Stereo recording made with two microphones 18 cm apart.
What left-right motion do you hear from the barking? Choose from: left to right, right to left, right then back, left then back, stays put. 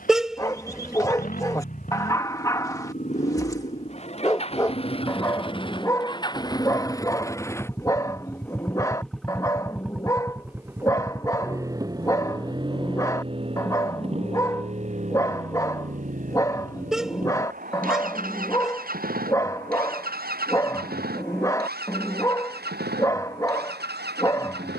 stays put.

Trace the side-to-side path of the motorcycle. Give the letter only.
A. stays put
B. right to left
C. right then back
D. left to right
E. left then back
D.